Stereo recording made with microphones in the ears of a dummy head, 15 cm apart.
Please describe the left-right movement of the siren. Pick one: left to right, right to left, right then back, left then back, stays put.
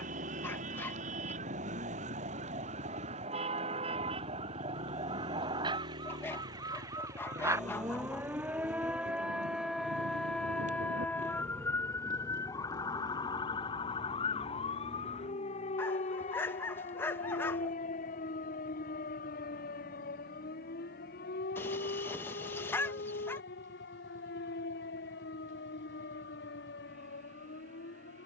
right to left.